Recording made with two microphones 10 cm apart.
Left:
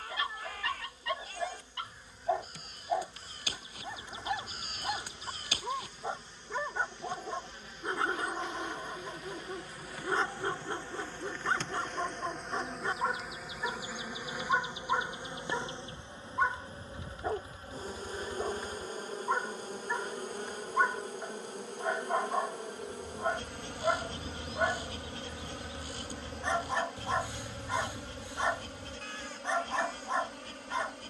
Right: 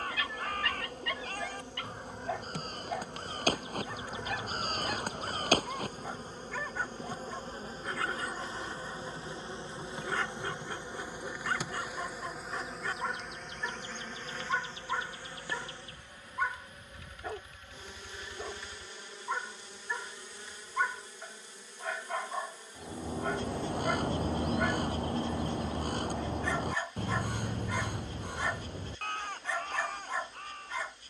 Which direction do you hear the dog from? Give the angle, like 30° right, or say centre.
20° left.